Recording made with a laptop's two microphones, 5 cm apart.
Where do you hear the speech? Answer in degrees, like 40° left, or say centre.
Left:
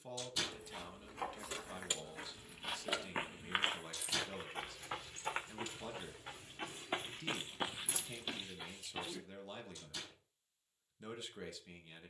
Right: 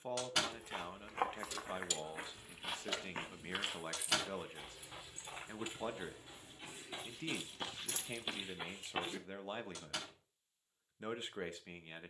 30° right.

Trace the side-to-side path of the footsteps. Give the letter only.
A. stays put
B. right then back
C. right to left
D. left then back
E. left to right
D.